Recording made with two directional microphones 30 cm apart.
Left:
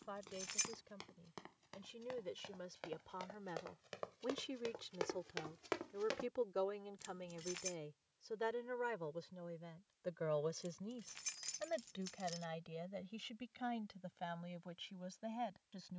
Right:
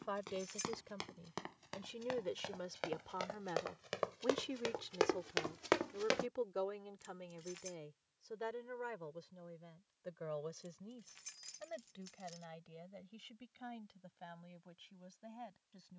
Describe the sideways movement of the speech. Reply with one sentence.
You can hear the speech go from the right side to the left.